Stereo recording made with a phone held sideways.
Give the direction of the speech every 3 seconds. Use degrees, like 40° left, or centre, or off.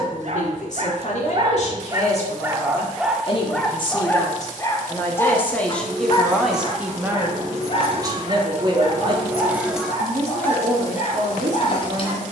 50° left, 20° left, 20° right, 50° right.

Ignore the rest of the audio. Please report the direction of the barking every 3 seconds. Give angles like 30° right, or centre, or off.
30° right, 20° left, 40° left, 50° left.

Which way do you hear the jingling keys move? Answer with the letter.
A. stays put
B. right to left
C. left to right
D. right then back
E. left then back
B.